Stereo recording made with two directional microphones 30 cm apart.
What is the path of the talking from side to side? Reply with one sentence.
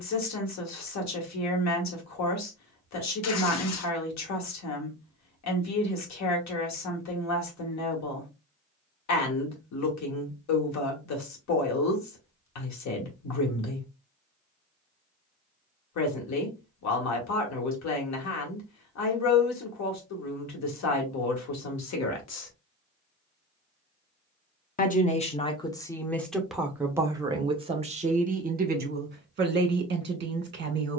You can hear the talking move from left to right.